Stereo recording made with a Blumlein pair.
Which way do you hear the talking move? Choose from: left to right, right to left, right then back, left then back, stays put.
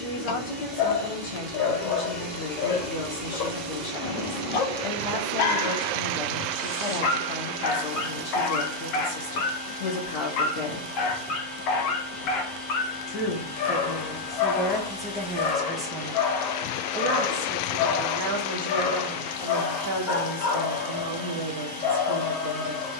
left to right.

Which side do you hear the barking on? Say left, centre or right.
left.